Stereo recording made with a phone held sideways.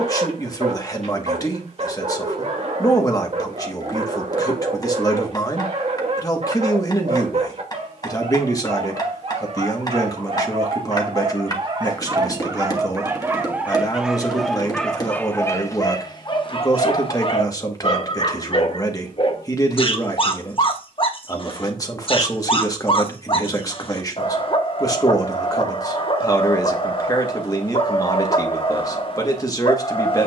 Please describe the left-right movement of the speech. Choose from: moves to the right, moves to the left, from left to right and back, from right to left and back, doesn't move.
doesn't move.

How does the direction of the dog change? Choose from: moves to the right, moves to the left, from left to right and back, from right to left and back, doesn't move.
moves to the left.